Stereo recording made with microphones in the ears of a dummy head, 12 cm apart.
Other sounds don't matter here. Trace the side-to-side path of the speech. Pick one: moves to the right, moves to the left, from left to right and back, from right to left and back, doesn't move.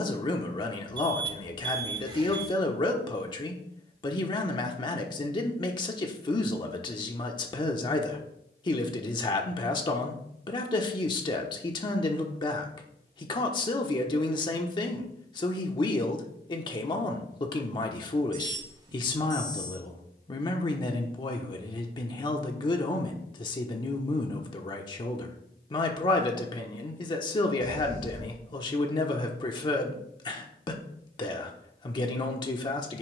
doesn't move.